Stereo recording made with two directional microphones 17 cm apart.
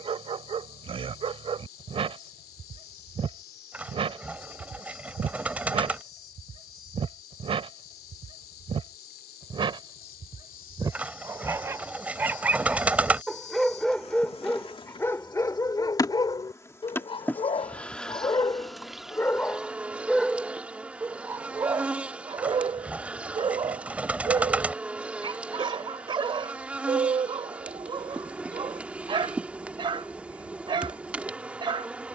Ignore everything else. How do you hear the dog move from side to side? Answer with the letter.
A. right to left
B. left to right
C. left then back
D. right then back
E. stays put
C.